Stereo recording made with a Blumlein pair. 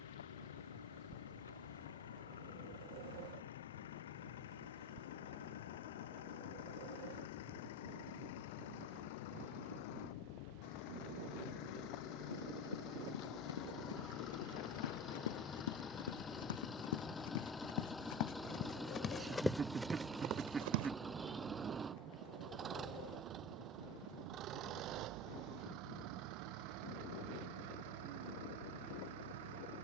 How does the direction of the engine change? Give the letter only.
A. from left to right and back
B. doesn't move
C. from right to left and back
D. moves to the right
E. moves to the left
D.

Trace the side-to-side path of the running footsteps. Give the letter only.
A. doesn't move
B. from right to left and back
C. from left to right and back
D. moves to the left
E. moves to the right
E.